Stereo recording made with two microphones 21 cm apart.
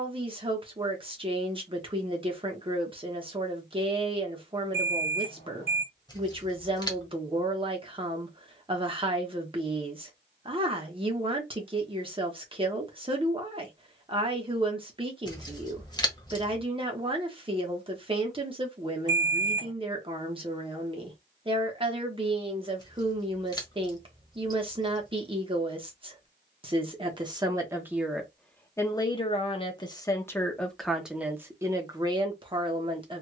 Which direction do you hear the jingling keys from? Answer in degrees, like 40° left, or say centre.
20° left.